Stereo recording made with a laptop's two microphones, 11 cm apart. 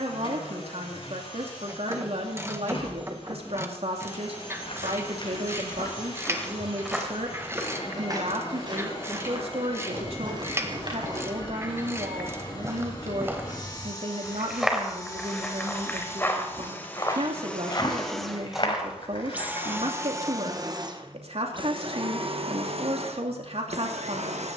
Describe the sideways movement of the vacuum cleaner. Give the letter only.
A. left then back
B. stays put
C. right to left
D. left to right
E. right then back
D.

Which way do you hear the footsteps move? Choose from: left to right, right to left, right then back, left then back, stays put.
right then back.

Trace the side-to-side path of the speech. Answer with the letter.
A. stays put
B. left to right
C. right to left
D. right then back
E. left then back
A.